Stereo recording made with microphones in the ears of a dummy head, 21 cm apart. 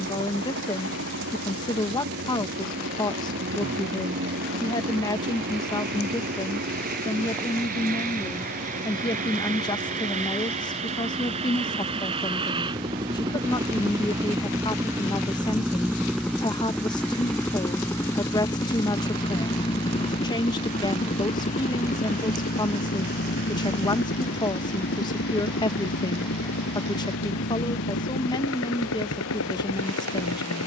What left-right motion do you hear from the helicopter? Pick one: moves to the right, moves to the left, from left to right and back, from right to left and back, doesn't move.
moves to the left.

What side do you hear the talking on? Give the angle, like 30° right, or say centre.
20° left.